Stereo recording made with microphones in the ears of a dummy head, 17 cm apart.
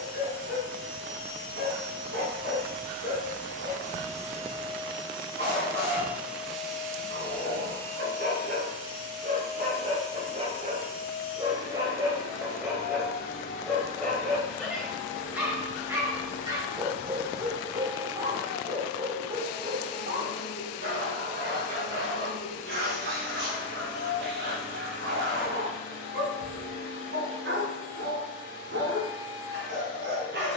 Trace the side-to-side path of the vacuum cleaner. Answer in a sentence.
In this clip you hear the vacuum cleaner move from right to left.